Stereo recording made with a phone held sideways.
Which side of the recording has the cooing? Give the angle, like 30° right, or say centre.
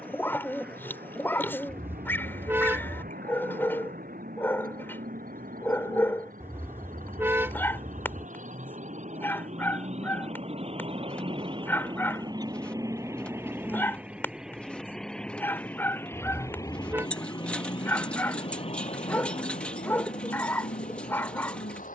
10° left.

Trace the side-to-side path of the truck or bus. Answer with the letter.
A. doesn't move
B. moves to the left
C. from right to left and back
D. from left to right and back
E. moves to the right
B.